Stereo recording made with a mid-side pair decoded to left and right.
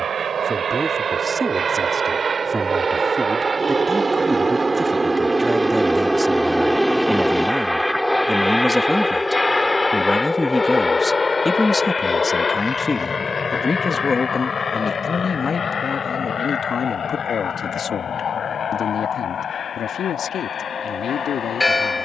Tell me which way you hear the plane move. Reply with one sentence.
You can hear the plane go from the right side to the left.